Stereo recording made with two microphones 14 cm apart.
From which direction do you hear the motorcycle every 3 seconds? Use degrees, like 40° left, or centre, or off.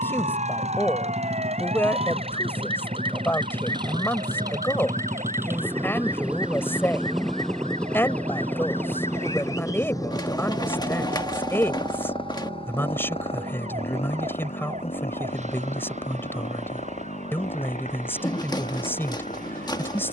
50° right, 30° right, centre, 30° left, 40° left, 50° left, 60° left.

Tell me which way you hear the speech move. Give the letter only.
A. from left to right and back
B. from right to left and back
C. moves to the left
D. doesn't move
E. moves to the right
D.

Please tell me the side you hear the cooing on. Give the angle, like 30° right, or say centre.
30° left.